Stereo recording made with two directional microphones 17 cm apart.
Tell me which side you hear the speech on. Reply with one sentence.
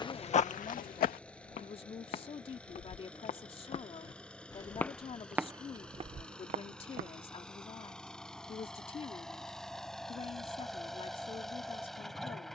You can hear the speech on the left.